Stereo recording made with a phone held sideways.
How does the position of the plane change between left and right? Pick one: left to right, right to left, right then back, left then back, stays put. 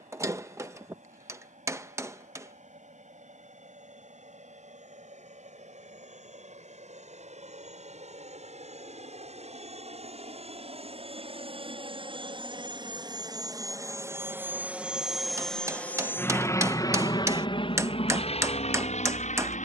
right to left.